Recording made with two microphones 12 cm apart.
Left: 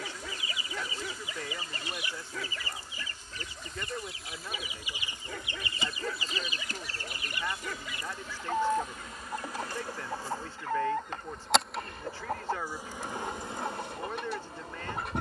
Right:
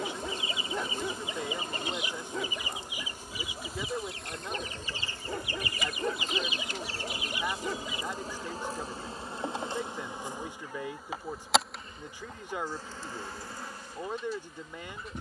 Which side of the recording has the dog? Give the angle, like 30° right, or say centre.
20° right.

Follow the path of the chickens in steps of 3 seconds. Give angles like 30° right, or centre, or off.
20° right, 10° left, 60° left, 80° left, 80° left.